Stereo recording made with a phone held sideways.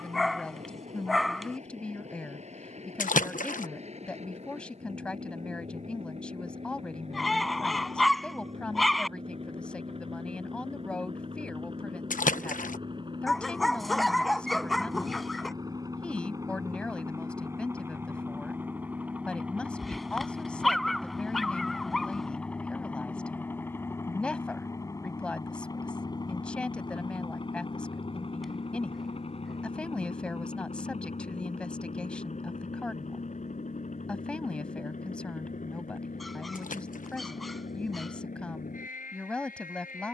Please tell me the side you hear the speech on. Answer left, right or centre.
centre.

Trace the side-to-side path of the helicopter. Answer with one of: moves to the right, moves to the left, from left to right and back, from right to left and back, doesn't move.
moves to the left.